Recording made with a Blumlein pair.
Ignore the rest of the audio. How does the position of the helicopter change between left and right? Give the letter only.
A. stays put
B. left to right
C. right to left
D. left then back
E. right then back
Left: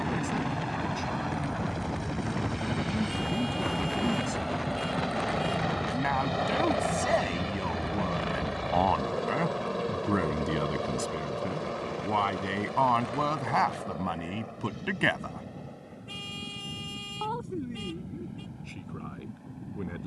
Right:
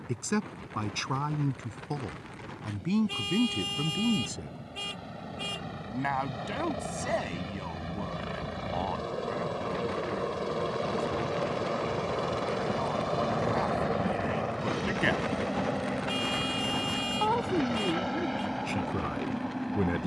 B.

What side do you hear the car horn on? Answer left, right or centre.
right.